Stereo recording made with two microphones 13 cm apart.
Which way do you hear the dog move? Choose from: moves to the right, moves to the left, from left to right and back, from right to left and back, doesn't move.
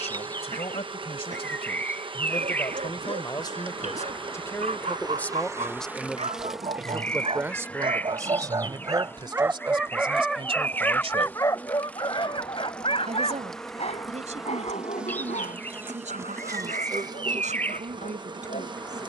moves to the left.